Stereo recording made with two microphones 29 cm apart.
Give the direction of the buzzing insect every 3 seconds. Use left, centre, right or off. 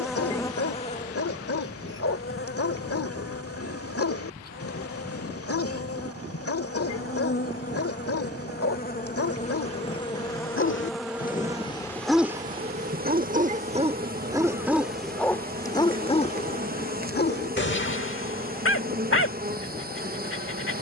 left, left, left, centre, right, right, right.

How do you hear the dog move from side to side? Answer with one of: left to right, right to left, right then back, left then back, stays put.
right then back.